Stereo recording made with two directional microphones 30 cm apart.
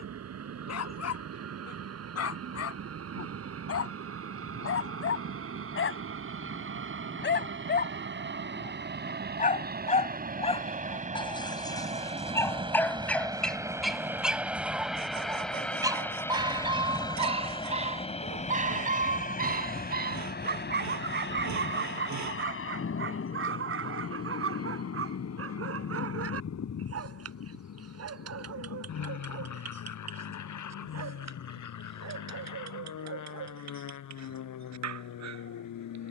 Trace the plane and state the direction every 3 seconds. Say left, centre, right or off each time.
right, right, right, right, centre, centre, left, left, left, left, left, left.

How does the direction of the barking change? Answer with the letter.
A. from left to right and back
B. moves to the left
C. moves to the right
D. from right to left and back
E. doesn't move
C.